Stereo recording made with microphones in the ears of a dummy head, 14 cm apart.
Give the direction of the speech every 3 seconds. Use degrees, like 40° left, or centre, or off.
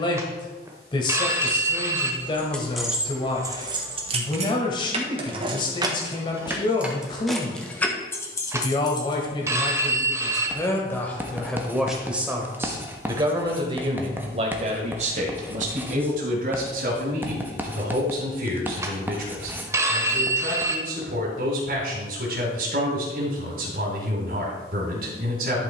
30° left, 30° left, 30° left, 20° left, 30° right, 60° right, 60° right, 60° right, 60° right.